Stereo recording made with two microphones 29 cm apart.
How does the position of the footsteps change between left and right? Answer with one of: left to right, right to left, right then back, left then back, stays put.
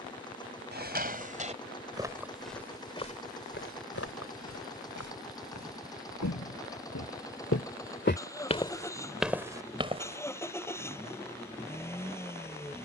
left then back.